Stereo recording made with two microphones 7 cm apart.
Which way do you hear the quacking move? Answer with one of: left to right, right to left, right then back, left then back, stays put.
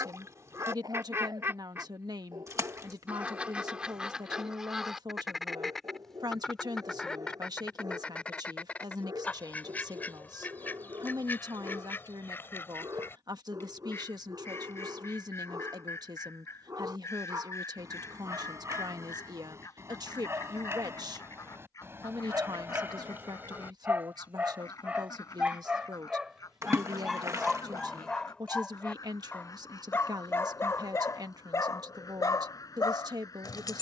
right to left.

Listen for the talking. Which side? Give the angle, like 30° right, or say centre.
60° right.